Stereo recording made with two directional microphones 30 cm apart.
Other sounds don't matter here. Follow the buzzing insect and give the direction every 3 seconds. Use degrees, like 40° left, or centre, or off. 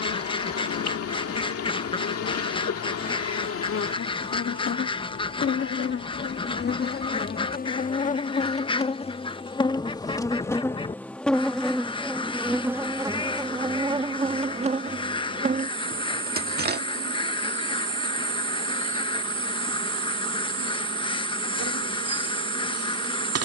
50° left, 40° left, 30° left, 10° left, 10° right, 30° right, 40° right, 50° right.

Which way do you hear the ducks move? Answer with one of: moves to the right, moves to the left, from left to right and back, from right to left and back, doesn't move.
doesn't move.